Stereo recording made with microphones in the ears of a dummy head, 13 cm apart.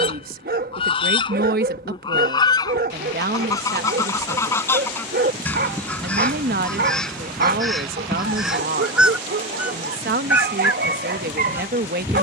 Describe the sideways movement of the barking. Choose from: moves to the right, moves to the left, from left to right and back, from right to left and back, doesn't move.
doesn't move.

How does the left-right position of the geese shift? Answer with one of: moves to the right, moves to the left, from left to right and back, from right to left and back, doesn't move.
moves to the right.